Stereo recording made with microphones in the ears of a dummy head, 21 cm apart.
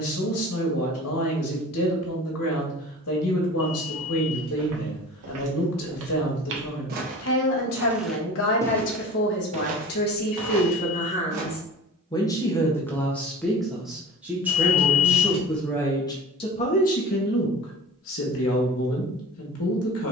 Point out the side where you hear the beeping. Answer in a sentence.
In this clip you hear the beeping on the left.